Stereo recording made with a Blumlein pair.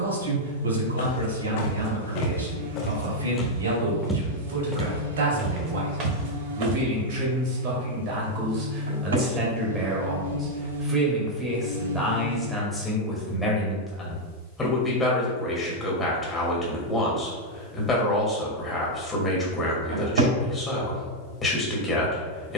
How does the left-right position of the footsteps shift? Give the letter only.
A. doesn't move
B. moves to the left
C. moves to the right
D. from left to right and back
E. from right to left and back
C.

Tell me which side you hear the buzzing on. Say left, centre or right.
right.